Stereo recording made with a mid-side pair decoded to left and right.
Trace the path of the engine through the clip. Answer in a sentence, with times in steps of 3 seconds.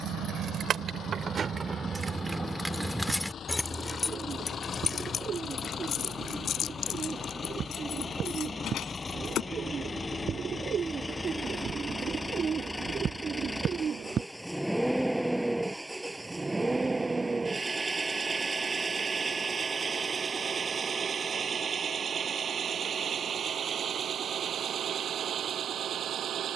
In this clip you hear the engine on the left from 0 s, in the centre from 12 s and on the right from 18 s.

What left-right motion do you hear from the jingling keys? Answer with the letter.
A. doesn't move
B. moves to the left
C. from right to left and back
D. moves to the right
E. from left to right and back
B.